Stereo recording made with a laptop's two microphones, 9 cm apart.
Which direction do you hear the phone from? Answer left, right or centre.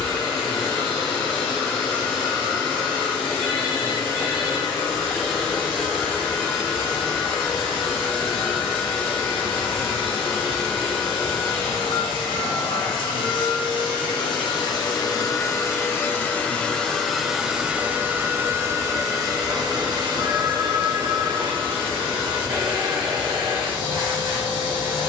right.